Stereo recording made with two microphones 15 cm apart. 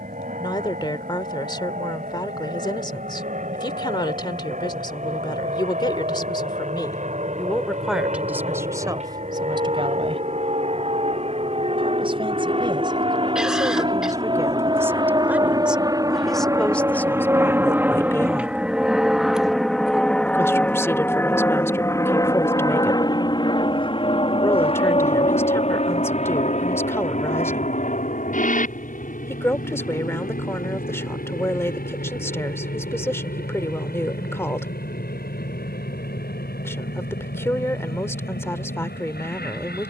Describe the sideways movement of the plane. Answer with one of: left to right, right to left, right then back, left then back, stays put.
right to left.